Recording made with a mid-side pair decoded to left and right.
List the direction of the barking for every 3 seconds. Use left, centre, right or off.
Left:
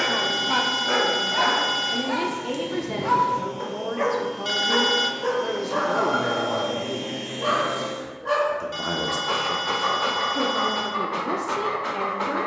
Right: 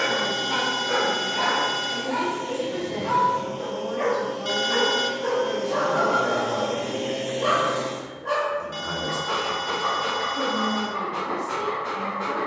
left, left, centre, left.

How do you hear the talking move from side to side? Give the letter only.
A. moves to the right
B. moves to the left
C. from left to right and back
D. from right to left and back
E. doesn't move
E.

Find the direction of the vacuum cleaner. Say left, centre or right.
right.